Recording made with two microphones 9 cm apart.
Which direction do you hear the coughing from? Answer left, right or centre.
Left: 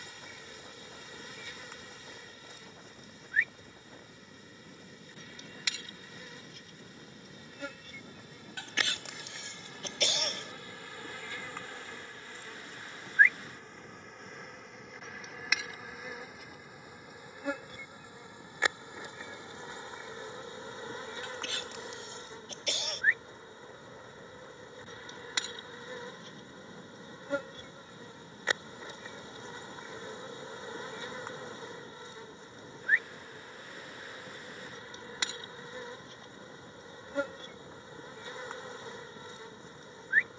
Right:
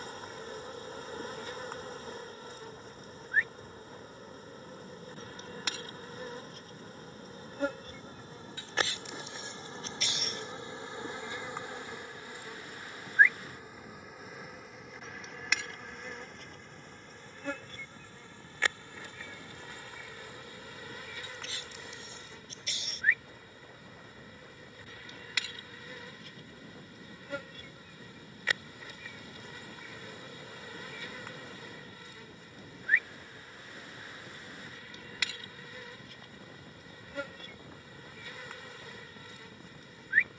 left.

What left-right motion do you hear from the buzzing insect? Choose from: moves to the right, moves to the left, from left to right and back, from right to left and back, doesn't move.
moves to the left.